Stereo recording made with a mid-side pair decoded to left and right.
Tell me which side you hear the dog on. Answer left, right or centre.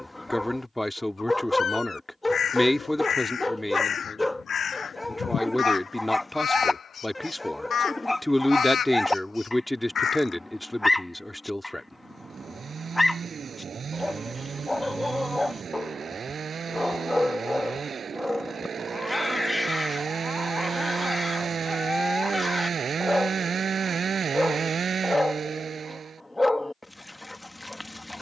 centre.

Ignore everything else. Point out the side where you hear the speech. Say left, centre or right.
centre.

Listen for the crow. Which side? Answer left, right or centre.
left.